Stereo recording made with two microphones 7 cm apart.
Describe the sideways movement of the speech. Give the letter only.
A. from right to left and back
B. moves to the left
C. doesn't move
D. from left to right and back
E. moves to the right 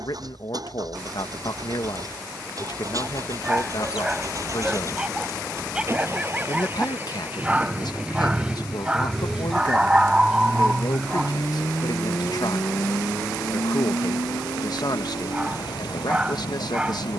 C.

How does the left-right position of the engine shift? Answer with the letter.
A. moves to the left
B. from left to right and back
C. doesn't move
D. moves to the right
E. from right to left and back
A.